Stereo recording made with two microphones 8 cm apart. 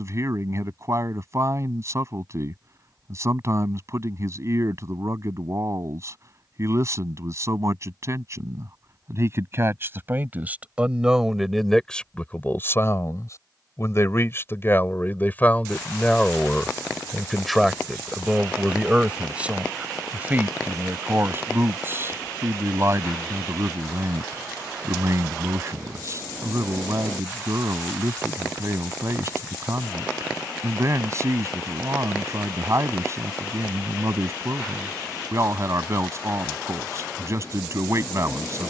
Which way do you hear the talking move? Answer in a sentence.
You can hear the talking move from right to left and back again.